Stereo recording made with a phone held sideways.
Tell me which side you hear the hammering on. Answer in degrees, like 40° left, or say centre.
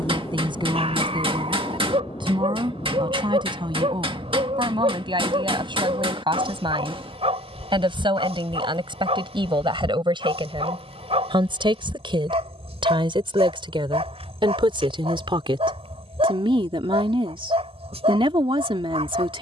40° right.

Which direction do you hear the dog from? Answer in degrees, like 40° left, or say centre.
40° right.